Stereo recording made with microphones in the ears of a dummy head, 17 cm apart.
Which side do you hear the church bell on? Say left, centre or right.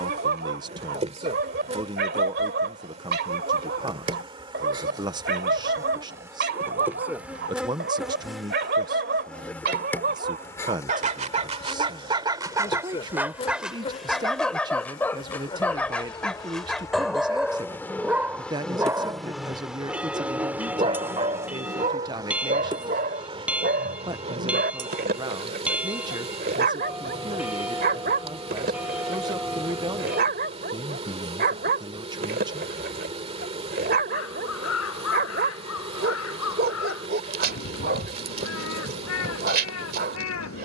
centre.